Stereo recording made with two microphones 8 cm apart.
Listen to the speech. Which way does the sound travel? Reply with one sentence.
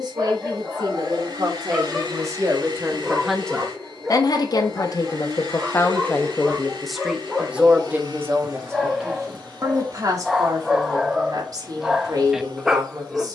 In this clip you hear the speech move from right to left and back again.